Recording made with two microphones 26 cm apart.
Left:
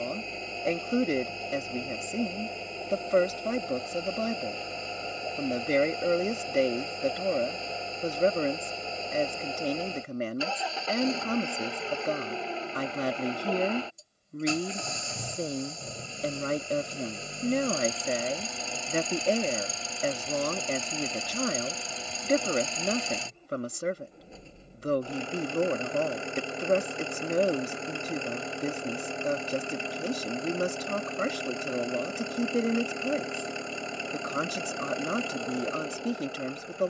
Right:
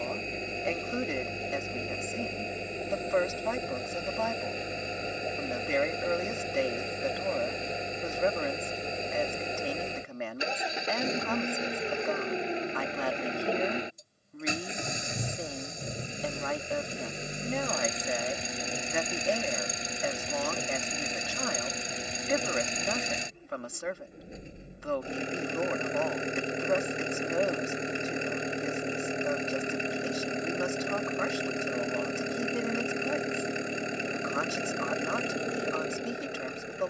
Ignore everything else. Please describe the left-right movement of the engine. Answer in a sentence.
In this clip you hear the engine stay put.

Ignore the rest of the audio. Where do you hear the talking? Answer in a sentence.
You can hear the talking on the left.